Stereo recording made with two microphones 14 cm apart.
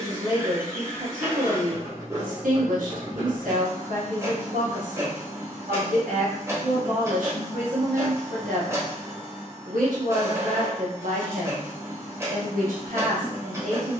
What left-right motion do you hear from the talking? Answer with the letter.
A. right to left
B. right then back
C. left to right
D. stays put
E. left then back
D.